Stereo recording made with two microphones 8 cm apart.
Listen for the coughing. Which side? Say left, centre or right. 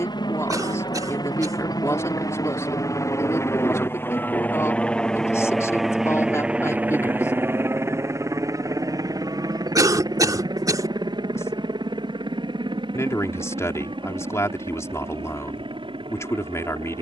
right.